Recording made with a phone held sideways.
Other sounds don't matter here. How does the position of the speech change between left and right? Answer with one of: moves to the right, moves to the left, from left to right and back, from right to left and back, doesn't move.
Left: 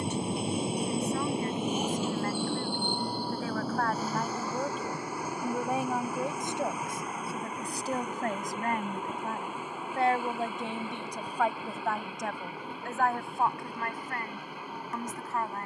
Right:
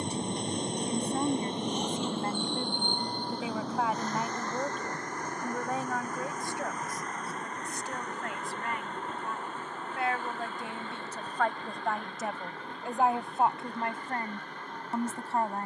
from right to left and back.